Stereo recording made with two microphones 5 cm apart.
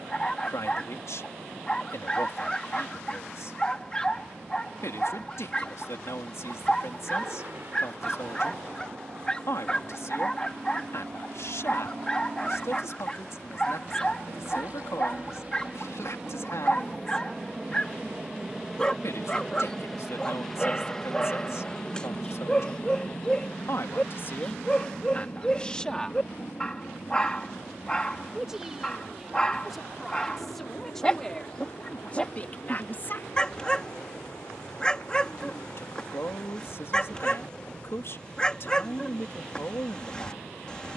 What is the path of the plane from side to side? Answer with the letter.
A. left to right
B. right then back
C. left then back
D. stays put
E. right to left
E.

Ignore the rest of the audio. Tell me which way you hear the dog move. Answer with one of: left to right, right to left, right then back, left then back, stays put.
stays put.